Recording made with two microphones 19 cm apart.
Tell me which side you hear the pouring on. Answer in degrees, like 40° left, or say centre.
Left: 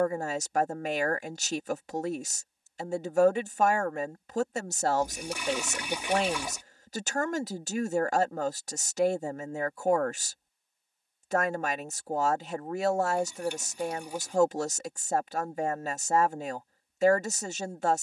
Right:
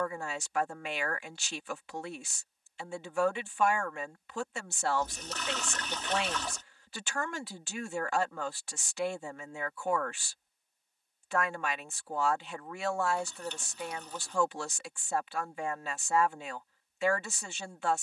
10° left.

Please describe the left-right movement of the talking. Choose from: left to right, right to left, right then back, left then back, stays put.
stays put.